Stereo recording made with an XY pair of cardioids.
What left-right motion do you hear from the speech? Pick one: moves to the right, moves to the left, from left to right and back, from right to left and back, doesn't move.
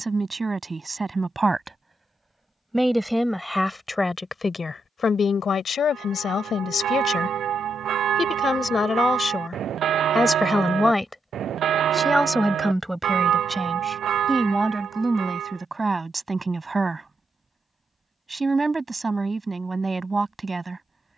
from right to left and back.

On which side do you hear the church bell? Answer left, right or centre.
right.